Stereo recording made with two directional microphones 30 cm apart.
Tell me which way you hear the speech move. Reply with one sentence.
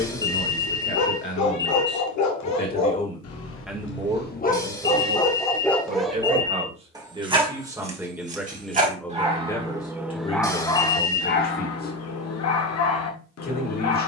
In this clip you hear the speech go right and come back.